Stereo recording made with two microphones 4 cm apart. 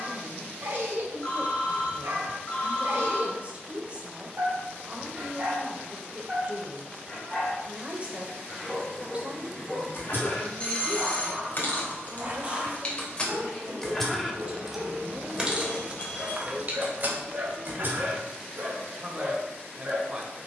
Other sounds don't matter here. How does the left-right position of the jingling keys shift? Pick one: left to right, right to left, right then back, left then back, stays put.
left to right.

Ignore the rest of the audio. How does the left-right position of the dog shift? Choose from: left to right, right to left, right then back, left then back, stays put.
left then back.